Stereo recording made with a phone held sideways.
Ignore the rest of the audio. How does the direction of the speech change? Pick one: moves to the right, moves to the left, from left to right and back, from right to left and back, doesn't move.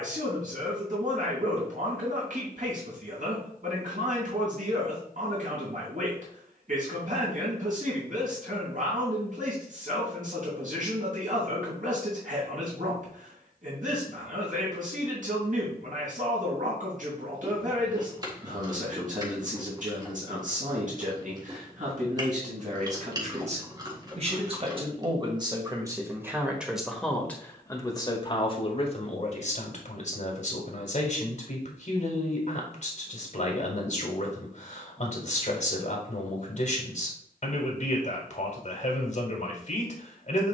moves to the left.